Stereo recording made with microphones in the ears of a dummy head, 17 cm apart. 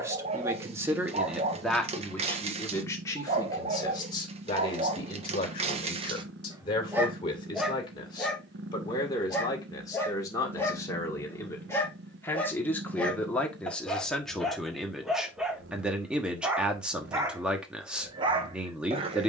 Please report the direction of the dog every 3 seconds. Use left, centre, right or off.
right, right, centre, centre, centre, centre, right.